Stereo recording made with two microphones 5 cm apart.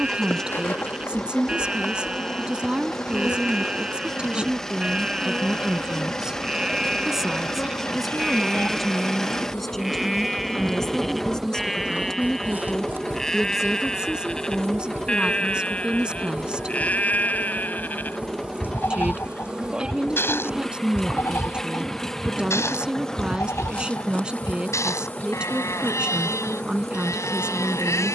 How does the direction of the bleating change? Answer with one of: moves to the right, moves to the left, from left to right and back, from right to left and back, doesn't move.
moves to the left.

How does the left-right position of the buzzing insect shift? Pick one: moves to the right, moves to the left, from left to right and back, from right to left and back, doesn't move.
from left to right and back.